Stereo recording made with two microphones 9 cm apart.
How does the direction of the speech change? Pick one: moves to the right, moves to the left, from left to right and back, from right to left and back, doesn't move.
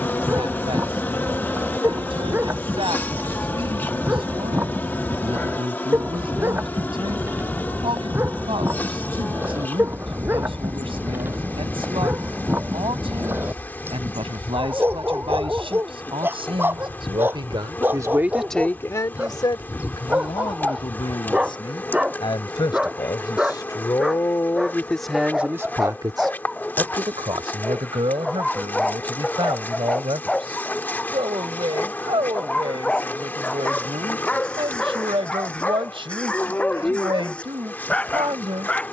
from right to left and back.